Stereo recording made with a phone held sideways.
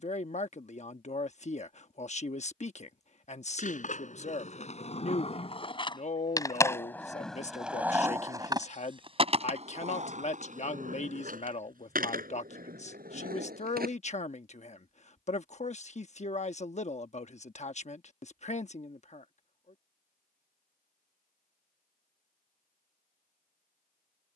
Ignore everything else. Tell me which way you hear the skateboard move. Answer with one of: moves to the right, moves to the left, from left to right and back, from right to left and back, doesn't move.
moves to the right.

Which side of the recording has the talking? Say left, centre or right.
left.